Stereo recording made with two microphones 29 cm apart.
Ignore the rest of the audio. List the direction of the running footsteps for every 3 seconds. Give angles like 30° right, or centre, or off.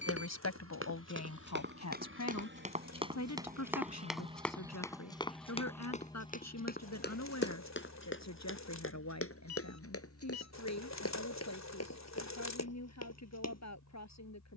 40° right, centre, 40° left, 50° left, 60° left.